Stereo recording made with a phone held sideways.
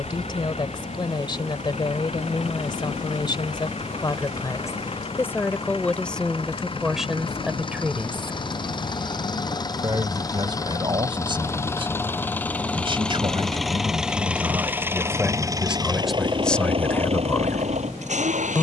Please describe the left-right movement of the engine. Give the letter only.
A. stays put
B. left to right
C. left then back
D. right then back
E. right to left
B.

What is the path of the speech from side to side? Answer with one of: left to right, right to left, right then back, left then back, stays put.
right then back.